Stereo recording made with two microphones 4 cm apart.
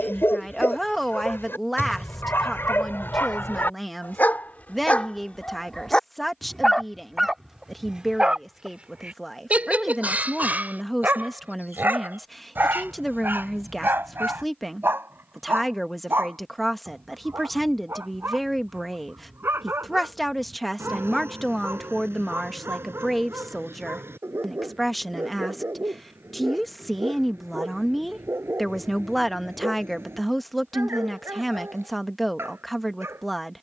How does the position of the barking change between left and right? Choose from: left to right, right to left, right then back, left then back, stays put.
left to right.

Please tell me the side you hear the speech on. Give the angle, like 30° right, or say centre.
centre.